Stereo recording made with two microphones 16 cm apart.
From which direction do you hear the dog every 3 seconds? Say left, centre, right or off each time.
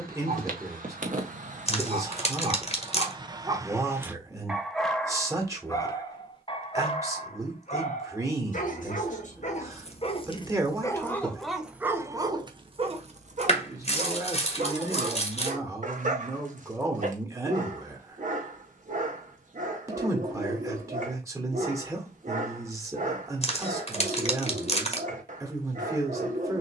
right, centre, left, left, right, right, right, right, right.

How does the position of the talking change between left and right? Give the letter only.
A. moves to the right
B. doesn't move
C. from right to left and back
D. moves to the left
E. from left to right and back
B.